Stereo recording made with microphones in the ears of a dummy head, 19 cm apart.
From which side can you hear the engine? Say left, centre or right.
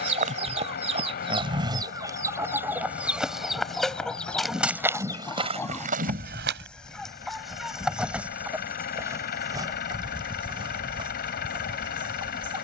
left.